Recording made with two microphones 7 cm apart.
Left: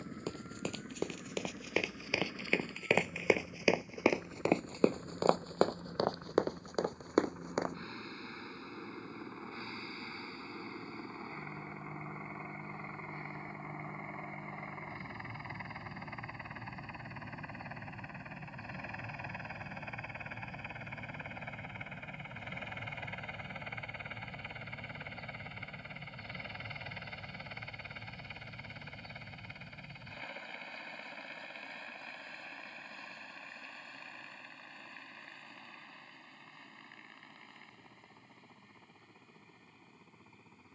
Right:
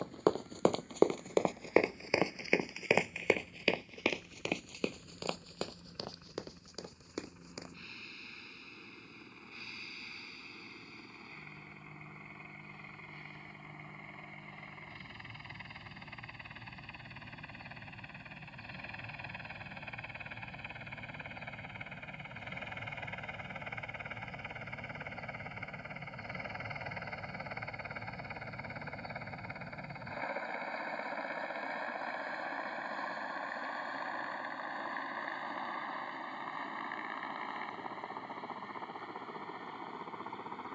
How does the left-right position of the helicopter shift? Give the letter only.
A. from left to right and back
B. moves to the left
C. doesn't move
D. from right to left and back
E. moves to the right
E.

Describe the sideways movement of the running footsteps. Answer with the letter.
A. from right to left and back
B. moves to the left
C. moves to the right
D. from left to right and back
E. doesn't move
B.